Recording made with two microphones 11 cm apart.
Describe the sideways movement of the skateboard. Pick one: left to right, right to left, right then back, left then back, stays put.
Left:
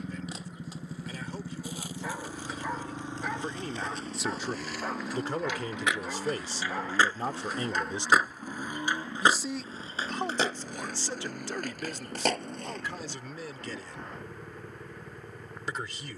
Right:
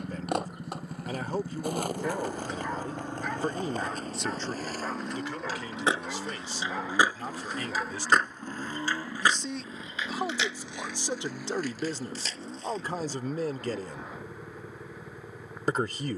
right to left.